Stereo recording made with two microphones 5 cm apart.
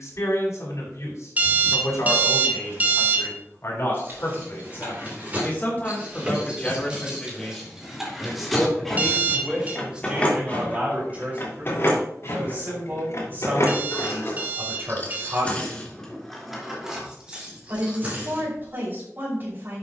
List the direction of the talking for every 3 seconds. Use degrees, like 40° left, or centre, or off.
60° left, 40° left, 10° left, 20° right, 40° right, 40° right, 40° right.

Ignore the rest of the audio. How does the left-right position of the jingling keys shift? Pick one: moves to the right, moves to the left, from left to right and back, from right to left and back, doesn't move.
from right to left and back.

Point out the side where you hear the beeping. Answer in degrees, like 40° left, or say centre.
30° right.